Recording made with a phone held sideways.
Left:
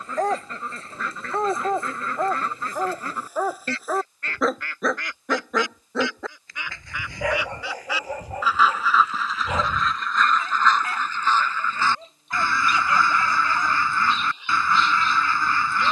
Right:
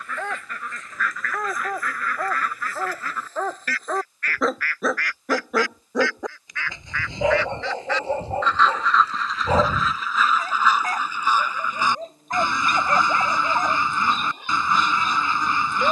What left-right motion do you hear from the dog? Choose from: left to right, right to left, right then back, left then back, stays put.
left to right.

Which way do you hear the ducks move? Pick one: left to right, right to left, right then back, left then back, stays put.
left to right.